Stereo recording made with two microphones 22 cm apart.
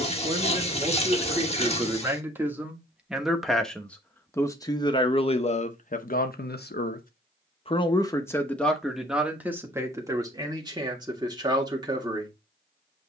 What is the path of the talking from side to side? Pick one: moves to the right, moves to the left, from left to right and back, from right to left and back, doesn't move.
from right to left and back.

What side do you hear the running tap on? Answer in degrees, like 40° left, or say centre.
30° left.